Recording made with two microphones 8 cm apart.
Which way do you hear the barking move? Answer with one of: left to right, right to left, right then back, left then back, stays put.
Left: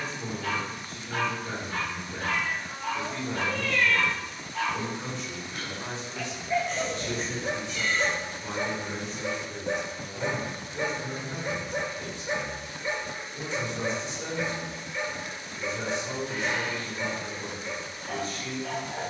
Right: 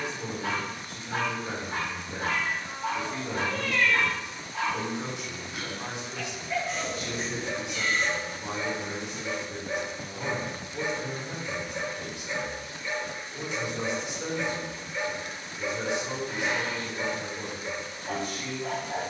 left then back.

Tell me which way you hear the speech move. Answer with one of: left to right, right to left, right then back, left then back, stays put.
stays put.